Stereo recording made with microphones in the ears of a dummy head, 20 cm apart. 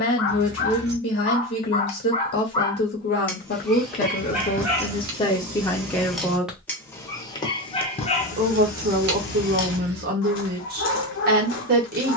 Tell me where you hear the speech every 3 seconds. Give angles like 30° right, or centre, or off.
50° left, 30° left, 20° right, 50° right.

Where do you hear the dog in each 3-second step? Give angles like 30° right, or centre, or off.
40° left, 10° right, 20° left, 60° left.